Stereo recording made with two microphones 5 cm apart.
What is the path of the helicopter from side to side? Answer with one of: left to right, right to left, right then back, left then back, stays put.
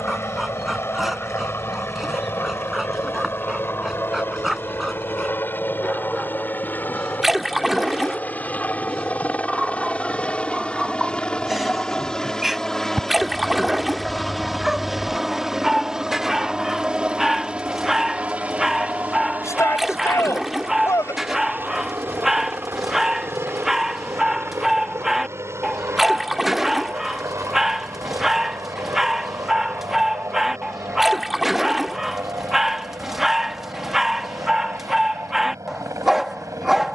left to right.